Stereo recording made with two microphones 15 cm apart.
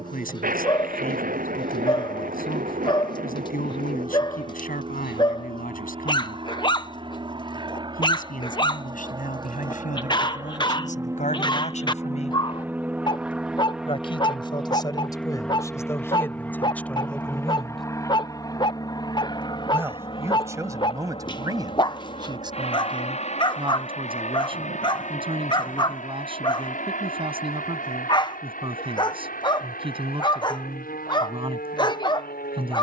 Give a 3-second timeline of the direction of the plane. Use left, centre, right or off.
right, right, right, right, centre, centre, left, left, left, left, left.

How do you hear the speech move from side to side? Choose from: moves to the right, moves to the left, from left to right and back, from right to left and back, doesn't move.
moves to the right.